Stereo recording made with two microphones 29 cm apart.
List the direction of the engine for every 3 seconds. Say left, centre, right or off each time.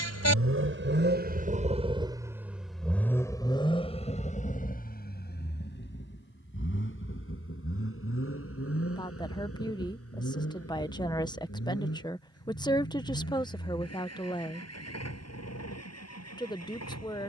right, left, left, left, left, left.